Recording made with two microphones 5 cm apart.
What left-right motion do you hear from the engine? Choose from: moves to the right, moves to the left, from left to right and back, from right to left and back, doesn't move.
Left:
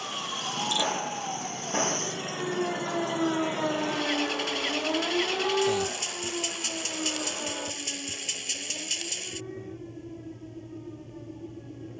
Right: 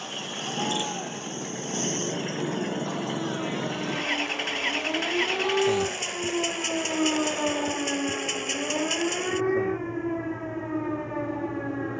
doesn't move.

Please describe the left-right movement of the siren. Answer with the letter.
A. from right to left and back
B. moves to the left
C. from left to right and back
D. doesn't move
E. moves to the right
E.